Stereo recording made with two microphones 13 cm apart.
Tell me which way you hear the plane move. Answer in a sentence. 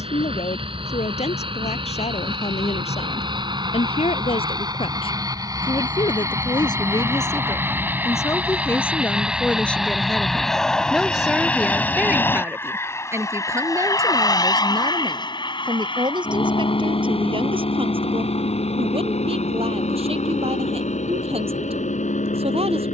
In this clip you hear the plane go from the right side to the left.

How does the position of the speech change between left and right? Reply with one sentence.
In this clip you hear the speech travel towards the right.